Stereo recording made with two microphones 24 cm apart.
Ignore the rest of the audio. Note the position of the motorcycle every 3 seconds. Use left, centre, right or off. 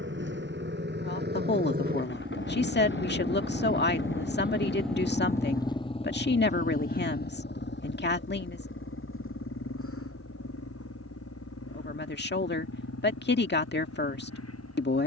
right, centre, left, left, left.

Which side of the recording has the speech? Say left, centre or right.
left.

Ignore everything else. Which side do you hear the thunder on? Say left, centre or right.
left.